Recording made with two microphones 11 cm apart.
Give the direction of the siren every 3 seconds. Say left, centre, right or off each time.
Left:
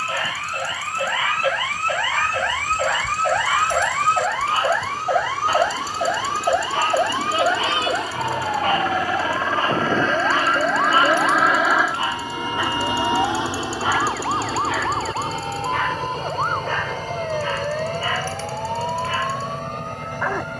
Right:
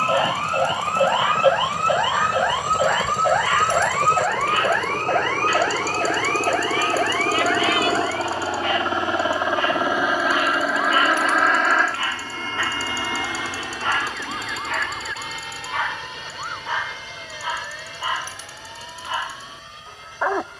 right, centre, left, left, left, left, left.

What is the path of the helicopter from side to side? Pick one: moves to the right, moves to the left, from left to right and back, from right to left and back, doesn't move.
moves to the left.